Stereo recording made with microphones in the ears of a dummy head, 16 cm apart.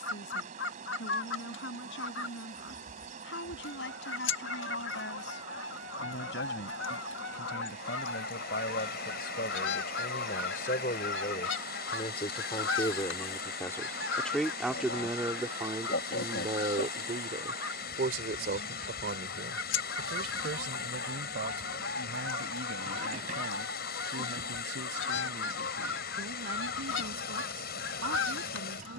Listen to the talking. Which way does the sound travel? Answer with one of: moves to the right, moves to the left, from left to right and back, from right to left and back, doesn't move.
moves to the right.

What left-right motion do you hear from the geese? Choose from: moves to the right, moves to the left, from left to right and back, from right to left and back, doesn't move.
doesn't move.